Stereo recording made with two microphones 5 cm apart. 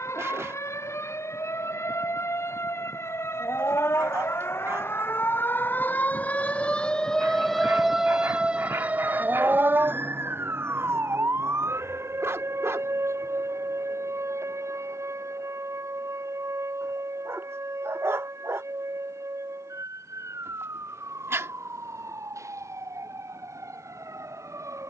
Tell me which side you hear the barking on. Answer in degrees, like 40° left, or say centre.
60° right.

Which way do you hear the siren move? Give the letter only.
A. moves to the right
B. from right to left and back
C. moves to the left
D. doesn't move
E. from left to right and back
A.